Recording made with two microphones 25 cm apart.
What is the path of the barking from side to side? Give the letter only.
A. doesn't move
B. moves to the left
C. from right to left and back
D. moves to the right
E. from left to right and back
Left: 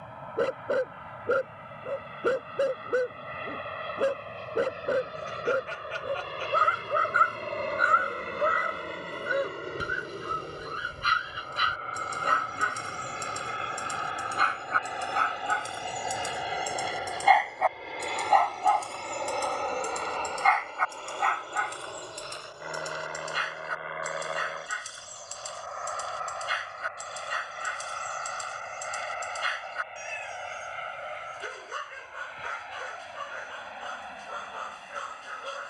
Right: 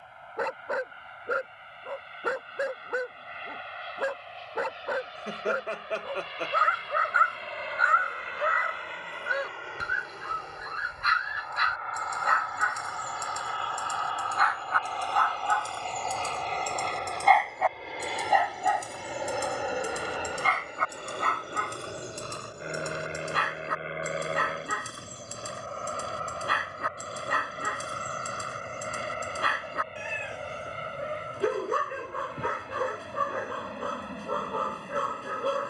D.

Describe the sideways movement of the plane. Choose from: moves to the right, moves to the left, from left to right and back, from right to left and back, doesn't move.
moves to the right.